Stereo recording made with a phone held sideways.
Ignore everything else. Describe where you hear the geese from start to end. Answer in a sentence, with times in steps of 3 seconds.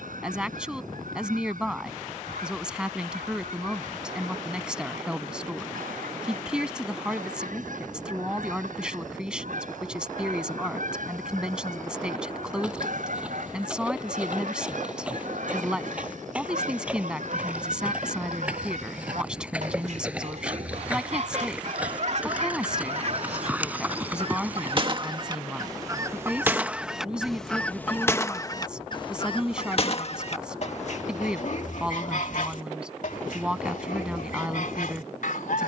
You can hear the geese on the right from 0 s and on the left from 27 s.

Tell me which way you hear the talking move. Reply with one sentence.
You can hear the talking stay in one place.